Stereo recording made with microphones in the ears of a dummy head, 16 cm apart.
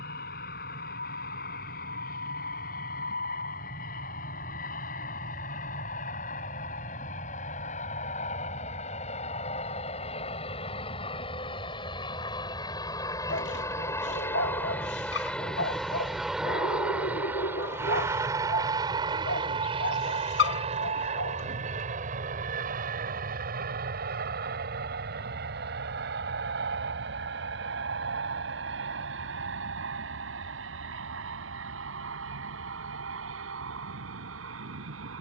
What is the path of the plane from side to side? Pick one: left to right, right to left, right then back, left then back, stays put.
left to right.